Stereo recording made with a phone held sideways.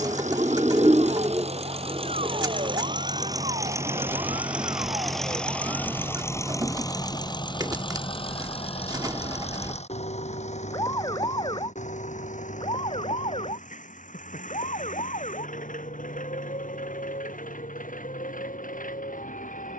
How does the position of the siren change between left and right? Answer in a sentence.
In this clip you hear the siren travel towards the left.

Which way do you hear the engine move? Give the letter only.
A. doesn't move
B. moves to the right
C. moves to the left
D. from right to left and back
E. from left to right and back
C.